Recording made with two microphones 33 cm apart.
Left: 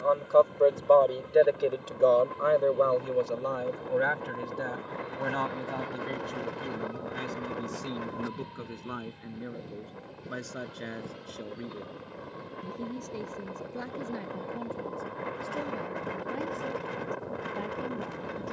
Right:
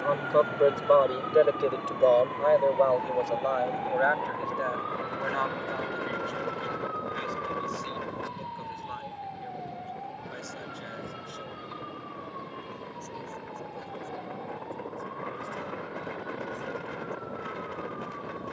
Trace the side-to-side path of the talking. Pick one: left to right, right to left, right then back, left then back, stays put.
right to left.